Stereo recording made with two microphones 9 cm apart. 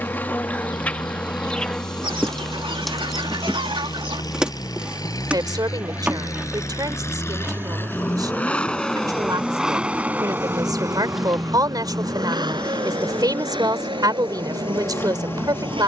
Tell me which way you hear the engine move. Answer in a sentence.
You can hear the engine move to the right.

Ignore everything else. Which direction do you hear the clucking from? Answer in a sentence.
In this clip you hear the clucking on the right.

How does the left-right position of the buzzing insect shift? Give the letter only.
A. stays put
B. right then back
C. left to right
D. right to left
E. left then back
B.